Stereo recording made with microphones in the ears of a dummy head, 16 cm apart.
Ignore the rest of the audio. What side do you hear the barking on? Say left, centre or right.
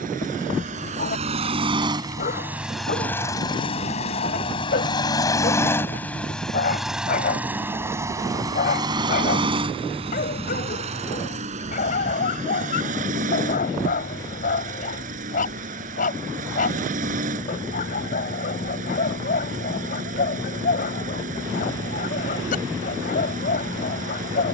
left.